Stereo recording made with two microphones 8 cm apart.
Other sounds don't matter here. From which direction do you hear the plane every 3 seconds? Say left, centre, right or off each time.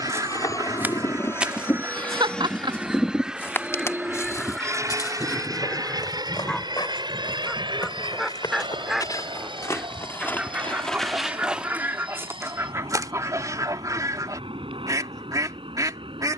left, right, right, right, right, right.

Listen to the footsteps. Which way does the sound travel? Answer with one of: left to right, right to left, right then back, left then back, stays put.
left then back.